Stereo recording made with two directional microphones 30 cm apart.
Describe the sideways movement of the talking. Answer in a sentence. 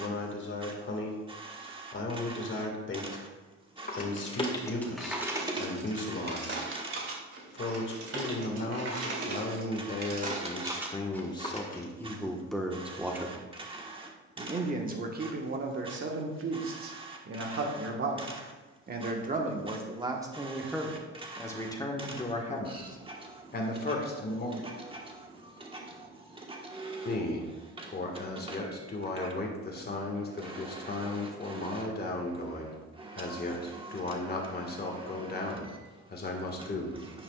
In this clip you hear the talking move from left to right and back again.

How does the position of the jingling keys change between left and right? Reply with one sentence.
In this clip you hear the jingling keys go right and come back.